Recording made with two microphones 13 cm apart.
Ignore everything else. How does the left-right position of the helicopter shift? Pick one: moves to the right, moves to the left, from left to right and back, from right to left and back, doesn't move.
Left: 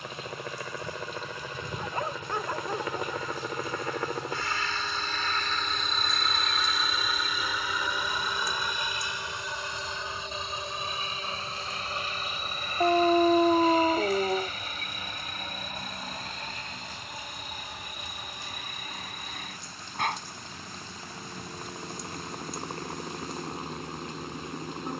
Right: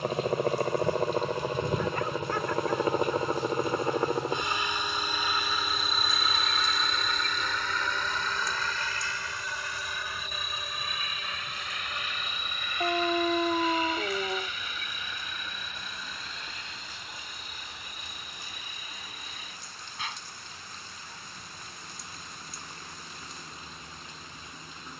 moves to the left.